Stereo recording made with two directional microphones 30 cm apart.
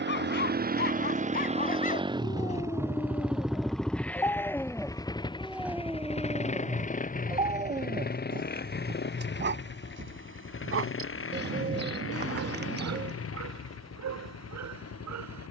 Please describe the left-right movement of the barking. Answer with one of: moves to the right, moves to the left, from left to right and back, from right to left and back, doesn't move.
moves to the right.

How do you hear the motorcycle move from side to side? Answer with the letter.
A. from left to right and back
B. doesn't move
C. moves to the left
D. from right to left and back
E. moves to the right
C.